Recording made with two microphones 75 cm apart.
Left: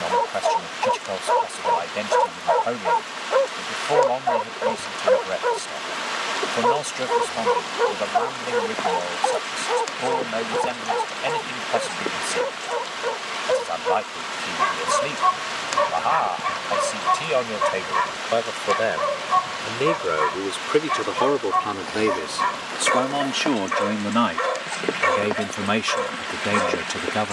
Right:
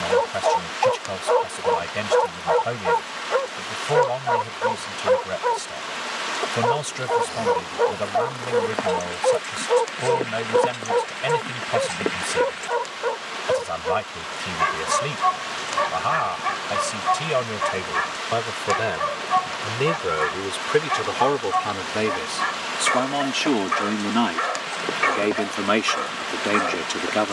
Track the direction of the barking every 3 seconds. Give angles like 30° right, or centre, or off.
60° right, 40° right, 20° right, 10° right, centre, 10° left, 10° left, 10° left, 10° left.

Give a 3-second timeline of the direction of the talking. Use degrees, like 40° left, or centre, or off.
50° right, 50° right, 50° right, 50° right, 50° right, 50° right, 40° right, 10° right, 30° left.